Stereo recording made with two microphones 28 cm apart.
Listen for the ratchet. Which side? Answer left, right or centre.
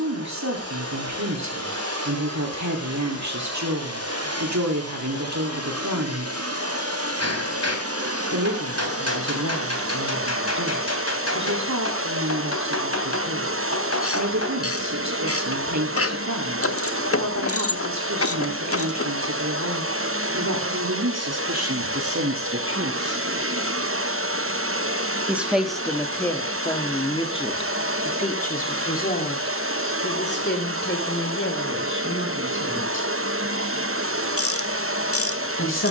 left.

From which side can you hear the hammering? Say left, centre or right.
left.